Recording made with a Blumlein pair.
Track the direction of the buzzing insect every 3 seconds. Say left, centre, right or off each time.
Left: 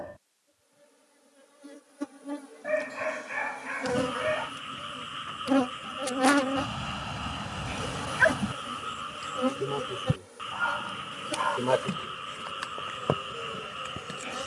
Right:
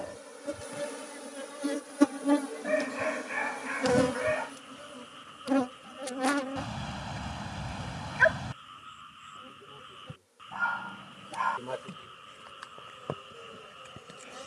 right, centre, left, left, left.